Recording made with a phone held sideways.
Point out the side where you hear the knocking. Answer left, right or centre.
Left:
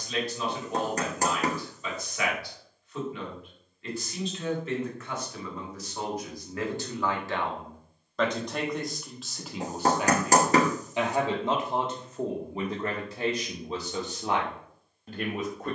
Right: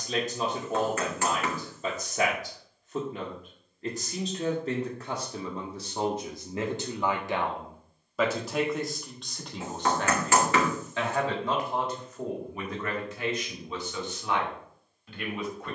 left.